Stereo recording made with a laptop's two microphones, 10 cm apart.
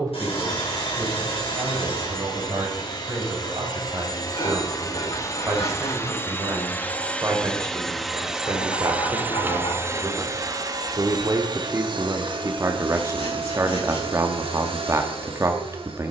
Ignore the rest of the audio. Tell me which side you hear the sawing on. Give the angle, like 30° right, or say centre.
70° left.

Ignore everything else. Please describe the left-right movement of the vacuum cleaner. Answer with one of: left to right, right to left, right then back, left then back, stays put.
left to right.